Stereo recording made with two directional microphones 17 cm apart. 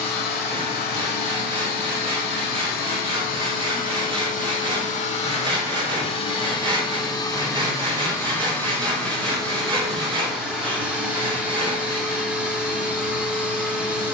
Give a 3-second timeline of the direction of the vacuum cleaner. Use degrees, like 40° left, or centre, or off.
70° left, 50° left, 20° left, centre, 10° right.